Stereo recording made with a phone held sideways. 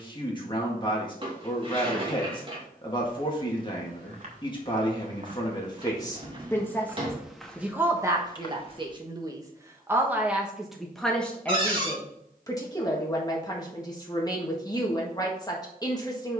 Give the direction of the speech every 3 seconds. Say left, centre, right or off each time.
left, left, centre, centre, left, left.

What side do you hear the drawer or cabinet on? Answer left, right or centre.
right.